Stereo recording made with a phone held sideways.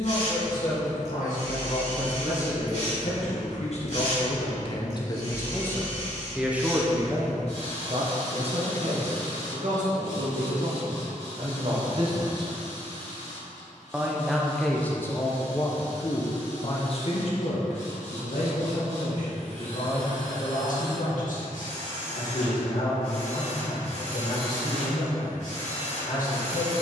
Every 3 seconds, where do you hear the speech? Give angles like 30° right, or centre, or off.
70° left, 40° left, 30° right, 50° right, 10° right, 40° left, 60° left, 70° left, 70° left.